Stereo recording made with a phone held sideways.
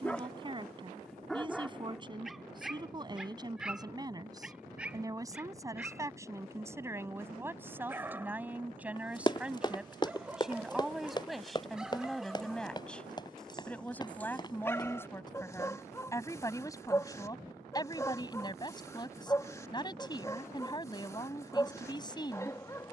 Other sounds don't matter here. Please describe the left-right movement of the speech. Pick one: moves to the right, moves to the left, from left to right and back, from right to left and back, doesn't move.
moves to the left.